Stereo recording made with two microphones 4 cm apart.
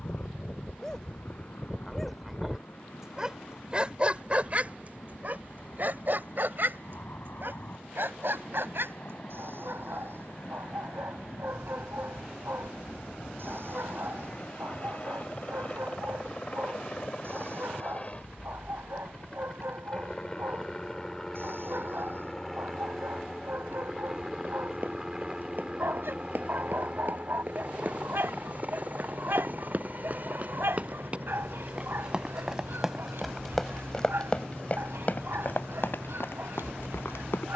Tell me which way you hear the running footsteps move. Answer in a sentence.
In this clip you hear the running footsteps go from the right side to the left.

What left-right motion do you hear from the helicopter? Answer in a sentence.
In this clip you hear the helicopter move to the right.